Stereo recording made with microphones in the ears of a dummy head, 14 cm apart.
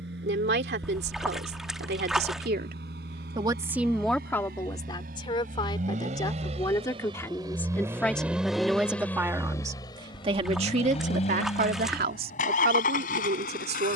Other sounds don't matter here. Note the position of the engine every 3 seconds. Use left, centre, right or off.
right, right, right, left, left.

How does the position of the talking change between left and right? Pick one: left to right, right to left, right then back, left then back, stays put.
left then back.